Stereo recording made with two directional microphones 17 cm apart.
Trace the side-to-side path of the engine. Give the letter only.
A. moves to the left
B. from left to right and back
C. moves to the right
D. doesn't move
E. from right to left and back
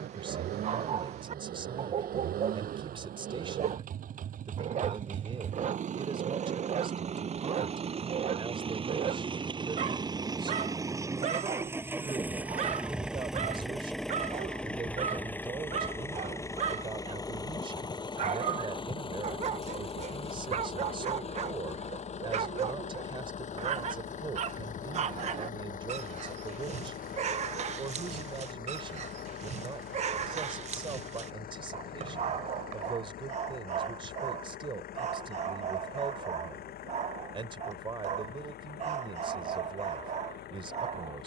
A.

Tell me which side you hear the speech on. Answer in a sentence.
In this clip you hear the speech on the right.